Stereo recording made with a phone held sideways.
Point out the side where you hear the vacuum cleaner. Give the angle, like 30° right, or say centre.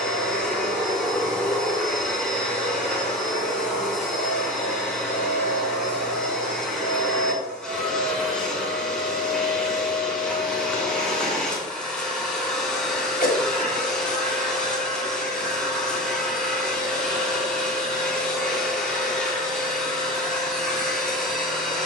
centre.